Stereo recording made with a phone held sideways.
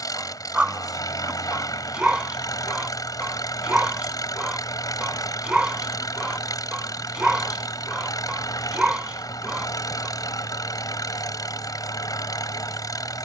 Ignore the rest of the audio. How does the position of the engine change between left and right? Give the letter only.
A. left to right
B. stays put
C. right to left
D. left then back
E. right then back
B.